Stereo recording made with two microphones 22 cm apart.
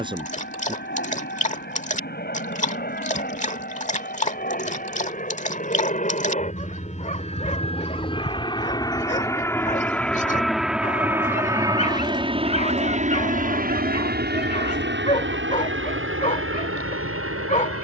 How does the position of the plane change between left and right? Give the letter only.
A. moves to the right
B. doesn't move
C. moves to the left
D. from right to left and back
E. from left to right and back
A.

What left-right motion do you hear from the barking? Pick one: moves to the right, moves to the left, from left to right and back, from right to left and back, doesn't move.
doesn't move.